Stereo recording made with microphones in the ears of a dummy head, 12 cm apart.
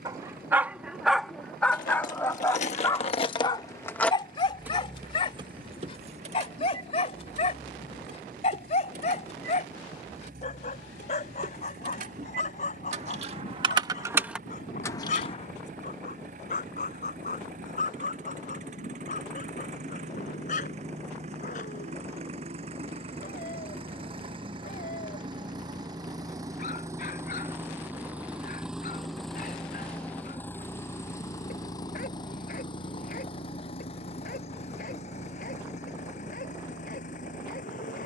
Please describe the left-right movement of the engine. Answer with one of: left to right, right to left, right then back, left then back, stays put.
right to left.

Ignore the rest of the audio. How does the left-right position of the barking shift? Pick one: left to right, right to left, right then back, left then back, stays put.
right to left.